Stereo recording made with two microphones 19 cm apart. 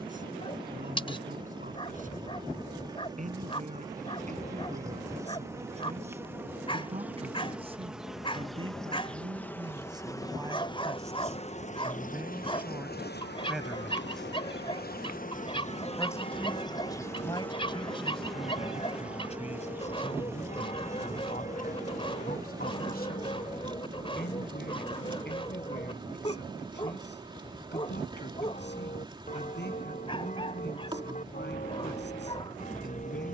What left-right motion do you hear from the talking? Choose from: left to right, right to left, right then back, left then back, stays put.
right to left.